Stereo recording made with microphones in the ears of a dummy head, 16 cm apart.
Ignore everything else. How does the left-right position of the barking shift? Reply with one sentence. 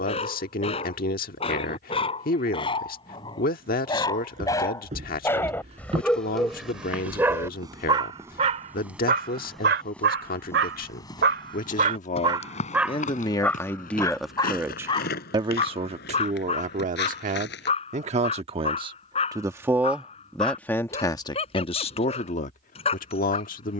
In this clip you hear the barking go right and come back.